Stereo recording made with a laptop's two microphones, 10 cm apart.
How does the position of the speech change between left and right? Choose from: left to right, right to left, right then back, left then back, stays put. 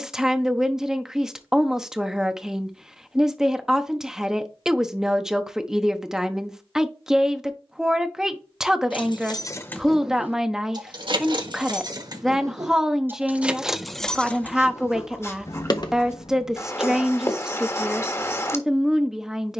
stays put.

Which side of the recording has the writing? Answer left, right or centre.
left.